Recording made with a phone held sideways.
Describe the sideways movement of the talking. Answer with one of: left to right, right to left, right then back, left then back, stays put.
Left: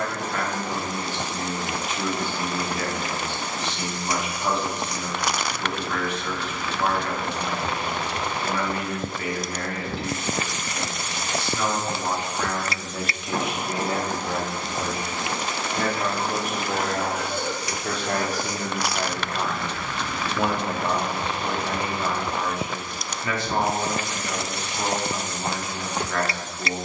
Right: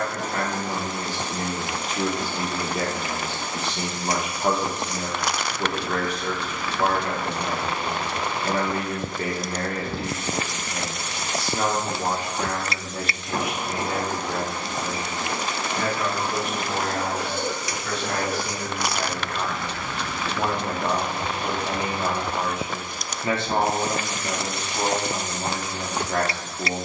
left then back.